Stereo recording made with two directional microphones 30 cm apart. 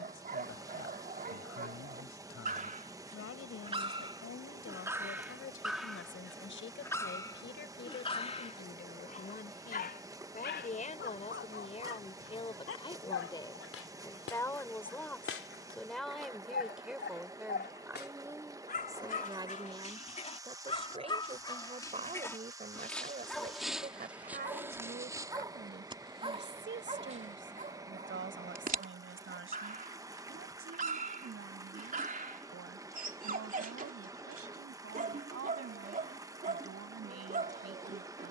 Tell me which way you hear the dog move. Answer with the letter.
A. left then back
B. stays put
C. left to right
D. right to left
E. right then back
A.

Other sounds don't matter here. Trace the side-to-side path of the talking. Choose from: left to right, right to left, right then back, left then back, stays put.
left to right.